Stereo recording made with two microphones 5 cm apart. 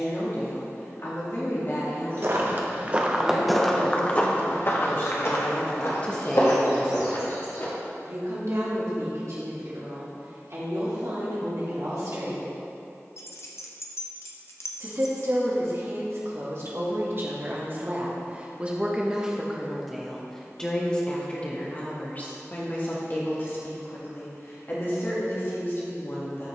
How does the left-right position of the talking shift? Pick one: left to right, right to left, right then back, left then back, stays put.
right then back.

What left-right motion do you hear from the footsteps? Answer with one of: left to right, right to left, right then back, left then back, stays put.
right to left.